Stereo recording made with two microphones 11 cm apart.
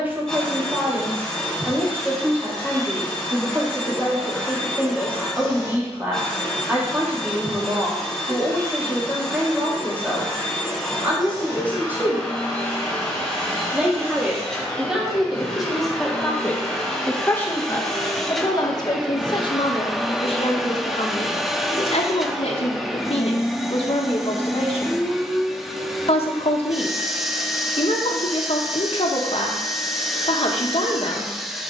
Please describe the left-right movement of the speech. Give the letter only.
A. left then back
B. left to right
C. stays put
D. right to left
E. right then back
D.